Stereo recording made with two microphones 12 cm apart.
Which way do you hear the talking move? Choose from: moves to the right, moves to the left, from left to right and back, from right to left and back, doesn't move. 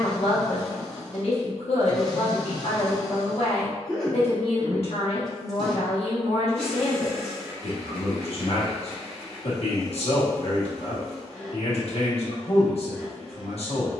doesn't move.